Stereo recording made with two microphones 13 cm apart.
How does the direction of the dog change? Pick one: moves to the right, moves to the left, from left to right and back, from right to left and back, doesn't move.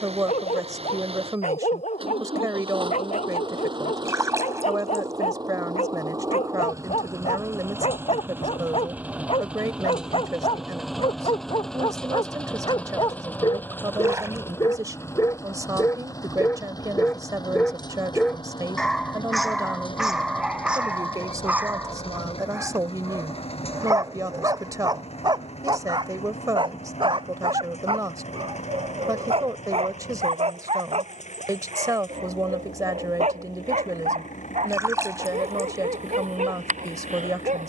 moves to the right.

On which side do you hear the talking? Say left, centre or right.
right.